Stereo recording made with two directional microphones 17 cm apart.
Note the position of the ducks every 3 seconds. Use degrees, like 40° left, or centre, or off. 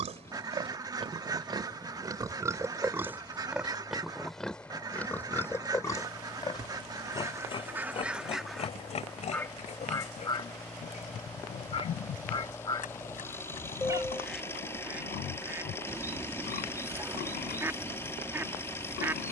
20° right, 20° right, 10° right, 20° left, 10° left, 10° right, 10° right.